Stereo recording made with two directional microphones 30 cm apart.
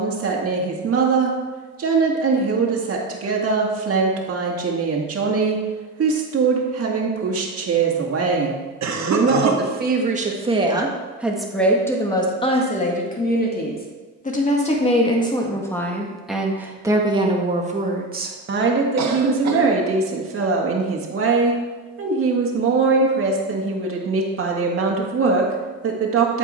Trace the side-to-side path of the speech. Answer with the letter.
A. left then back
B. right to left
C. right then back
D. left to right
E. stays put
A.